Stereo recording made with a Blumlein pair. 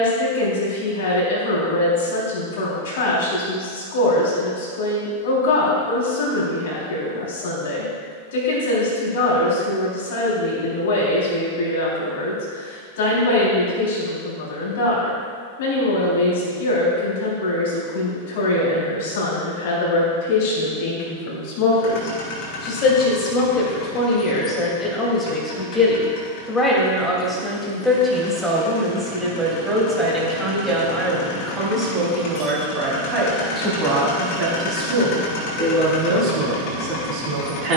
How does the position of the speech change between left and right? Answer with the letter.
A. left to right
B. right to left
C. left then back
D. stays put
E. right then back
A.